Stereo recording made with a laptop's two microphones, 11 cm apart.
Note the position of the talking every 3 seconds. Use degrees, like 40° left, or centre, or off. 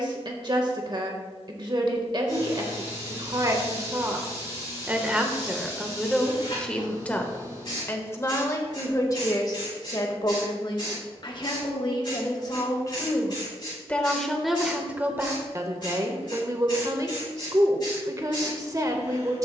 40° right, 20° right, 20° left, 40° left, 20° left, 30° right, 30° right.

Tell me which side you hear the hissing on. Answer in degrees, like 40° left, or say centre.
40° left.